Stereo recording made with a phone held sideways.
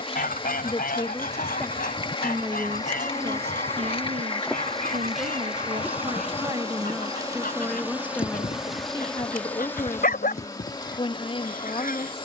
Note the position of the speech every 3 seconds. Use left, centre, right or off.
centre, right, centre, left.